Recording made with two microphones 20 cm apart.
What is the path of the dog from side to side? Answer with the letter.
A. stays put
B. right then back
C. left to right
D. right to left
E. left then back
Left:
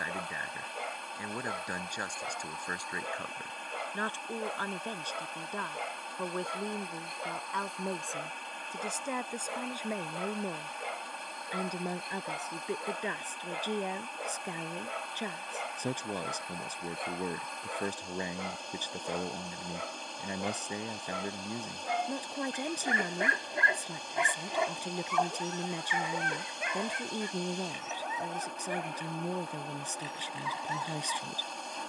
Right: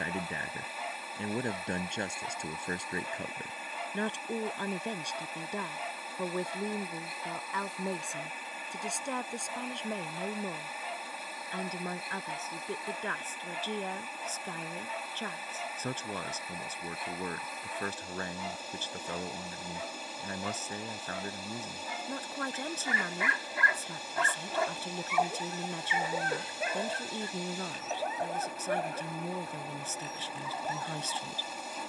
C.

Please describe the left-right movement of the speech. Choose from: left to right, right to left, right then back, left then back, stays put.
right to left.